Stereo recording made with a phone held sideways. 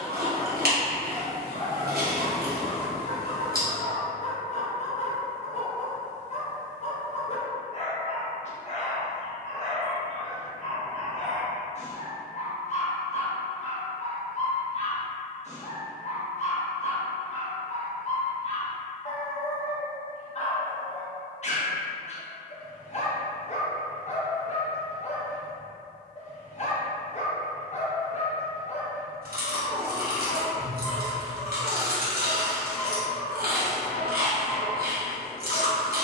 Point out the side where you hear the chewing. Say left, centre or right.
right.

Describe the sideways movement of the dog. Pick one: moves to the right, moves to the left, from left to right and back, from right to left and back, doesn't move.
doesn't move.